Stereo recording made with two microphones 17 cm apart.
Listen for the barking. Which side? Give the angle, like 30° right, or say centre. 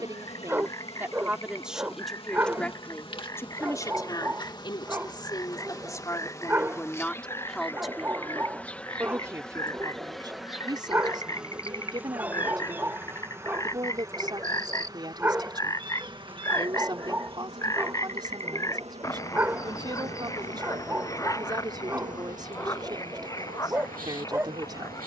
10° right.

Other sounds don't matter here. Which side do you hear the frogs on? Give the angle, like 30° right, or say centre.
20° left.